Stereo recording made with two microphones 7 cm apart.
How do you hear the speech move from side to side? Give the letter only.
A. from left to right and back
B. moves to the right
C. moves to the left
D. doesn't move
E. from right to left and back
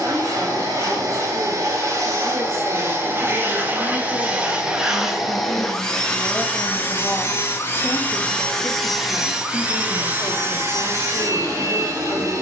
C.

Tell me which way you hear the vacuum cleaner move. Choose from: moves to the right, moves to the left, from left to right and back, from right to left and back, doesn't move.
from right to left and back.